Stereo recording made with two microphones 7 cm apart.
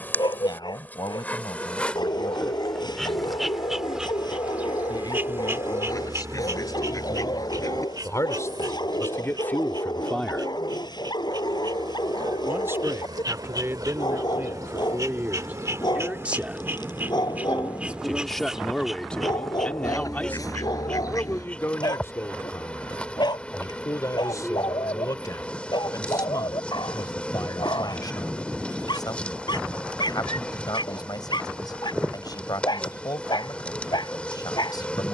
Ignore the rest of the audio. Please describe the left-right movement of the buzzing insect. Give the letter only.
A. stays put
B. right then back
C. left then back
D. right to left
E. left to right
B.